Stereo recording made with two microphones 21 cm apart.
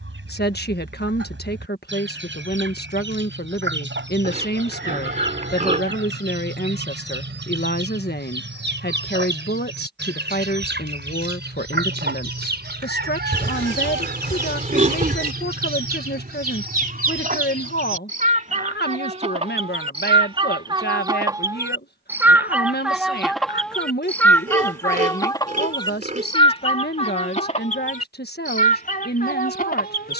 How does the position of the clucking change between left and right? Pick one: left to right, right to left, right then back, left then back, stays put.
right to left.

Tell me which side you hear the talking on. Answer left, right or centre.
left.